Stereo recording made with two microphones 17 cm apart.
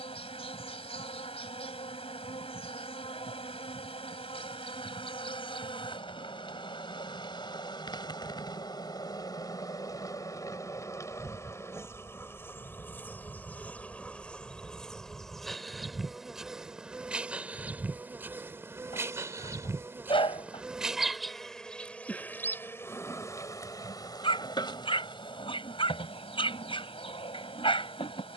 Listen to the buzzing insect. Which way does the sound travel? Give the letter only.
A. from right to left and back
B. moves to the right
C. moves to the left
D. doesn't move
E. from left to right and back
E.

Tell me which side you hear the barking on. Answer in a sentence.
In this clip you hear the barking on the left.